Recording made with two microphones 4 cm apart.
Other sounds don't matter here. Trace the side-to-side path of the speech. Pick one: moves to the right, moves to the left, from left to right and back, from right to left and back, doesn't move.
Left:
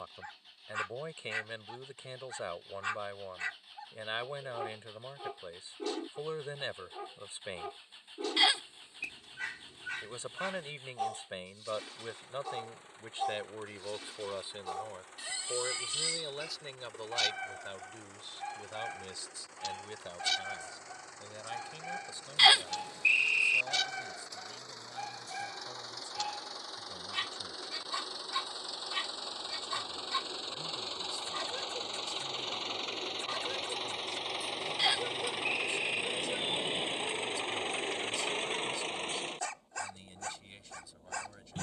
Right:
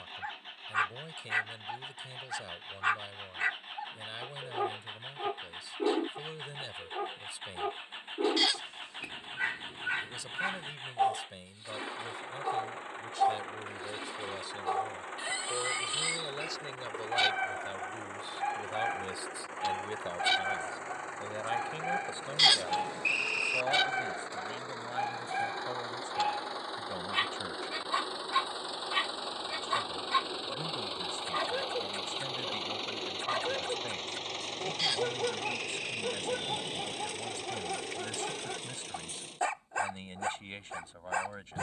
moves to the right.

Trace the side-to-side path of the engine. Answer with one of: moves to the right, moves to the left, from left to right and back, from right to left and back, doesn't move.
moves to the left.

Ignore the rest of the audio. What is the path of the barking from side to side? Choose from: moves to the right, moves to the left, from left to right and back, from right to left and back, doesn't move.
doesn't move.